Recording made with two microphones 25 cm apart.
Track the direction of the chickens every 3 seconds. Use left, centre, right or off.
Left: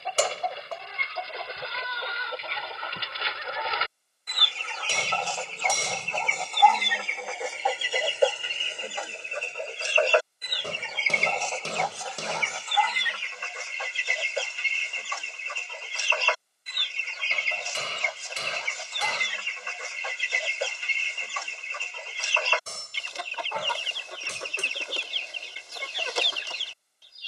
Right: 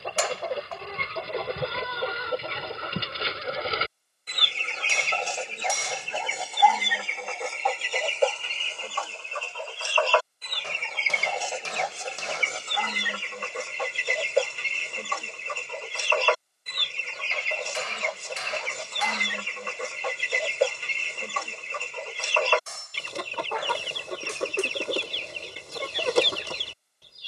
right, right, centre, centre, right, right, right, right, right.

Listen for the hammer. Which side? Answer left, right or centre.
left.